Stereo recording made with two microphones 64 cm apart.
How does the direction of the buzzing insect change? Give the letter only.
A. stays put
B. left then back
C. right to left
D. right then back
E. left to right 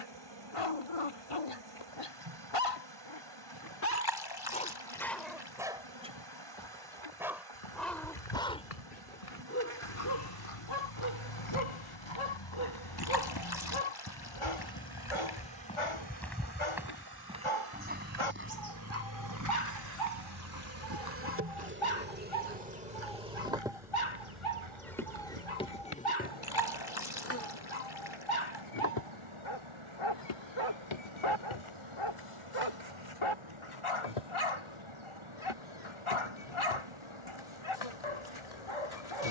C.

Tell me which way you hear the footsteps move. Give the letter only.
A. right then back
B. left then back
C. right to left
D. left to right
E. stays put
D.